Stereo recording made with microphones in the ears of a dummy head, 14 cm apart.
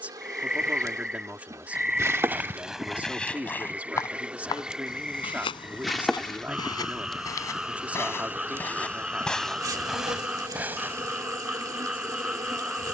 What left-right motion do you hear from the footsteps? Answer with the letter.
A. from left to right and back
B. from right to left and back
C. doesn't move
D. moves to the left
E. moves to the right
B.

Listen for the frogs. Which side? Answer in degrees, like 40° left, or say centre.
centre.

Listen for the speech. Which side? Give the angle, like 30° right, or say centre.
10° right.